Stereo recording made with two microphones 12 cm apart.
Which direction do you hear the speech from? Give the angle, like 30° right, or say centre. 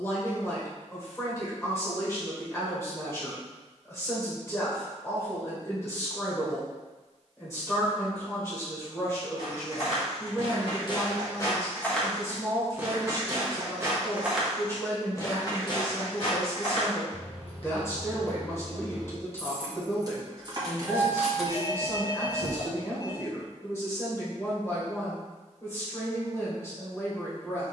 20° left.